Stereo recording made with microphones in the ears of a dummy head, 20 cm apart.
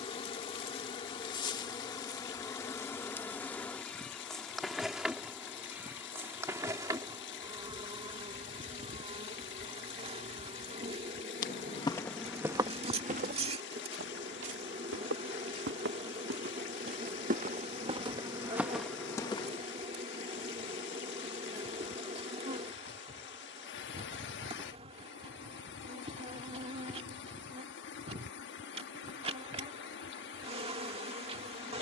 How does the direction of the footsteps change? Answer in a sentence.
You can hear the footsteps go right and come back.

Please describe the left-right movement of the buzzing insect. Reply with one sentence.
In this clip you hear the buzzing insect travel towards the right.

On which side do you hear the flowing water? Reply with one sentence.
You can hear the flowing water on the left.